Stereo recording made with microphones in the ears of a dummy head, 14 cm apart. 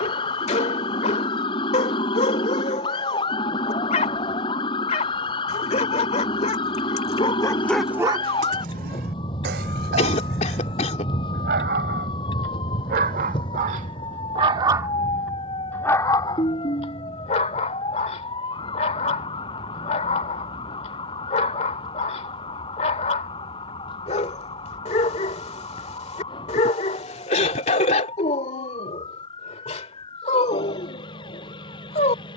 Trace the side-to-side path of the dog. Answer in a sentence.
In this clip you hear the dog move from left to right and back again.